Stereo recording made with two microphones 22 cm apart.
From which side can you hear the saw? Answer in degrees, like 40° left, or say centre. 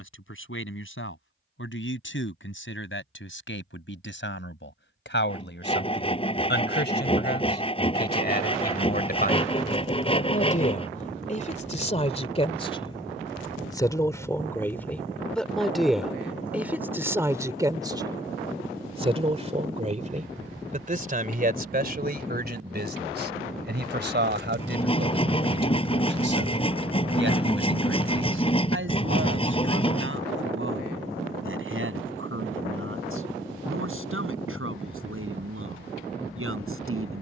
20° left.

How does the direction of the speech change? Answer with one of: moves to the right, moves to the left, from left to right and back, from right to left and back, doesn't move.
moves to the right.